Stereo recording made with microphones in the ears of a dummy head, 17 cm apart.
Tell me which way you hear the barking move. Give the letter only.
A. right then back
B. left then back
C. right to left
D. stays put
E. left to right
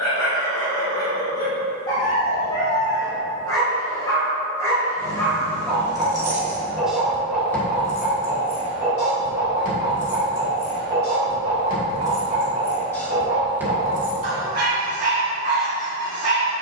E.